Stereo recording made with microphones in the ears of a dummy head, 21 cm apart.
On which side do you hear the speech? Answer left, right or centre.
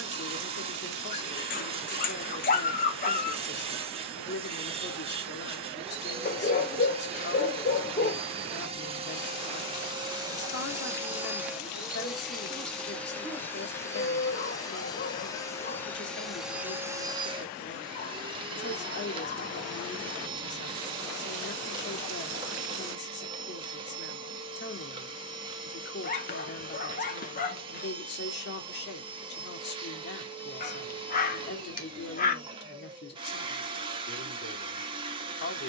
left.